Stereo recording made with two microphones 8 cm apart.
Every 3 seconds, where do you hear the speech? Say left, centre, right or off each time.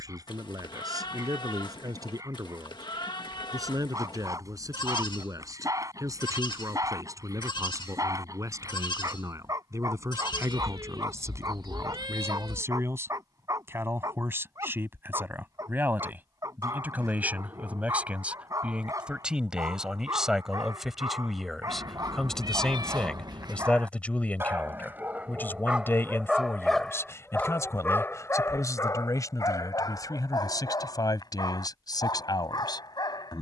right, right, right, right, right, right, centre, centre, left, left, left.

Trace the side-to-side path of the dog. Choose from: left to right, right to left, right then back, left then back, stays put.
right to left.